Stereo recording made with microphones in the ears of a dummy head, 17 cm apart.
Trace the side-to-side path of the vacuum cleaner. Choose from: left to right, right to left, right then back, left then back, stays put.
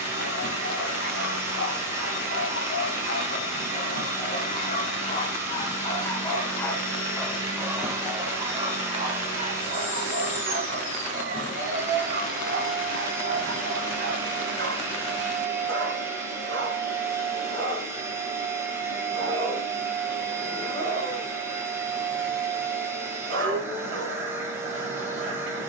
stays put.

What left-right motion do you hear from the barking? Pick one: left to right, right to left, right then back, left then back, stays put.
left to right.